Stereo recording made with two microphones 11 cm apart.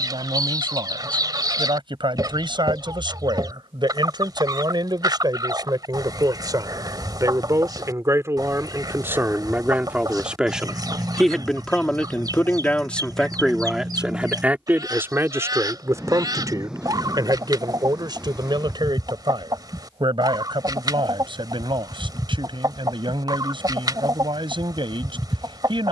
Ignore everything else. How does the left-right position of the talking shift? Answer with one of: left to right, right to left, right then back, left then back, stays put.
left then back.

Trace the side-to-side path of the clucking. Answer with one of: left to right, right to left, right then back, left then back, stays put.
stays put.